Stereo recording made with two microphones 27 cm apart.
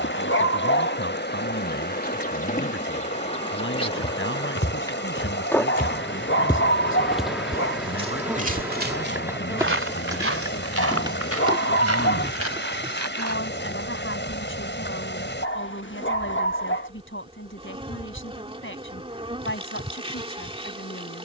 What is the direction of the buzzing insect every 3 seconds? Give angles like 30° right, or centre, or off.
40° left, 20° left, centre, 10° right, 20° right, 20° right, 20° right.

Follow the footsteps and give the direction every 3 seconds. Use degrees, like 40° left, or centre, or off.
off, 40° left, 20° right, 50° right, 70° right, off, off.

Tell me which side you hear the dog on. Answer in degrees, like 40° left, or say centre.
40° left.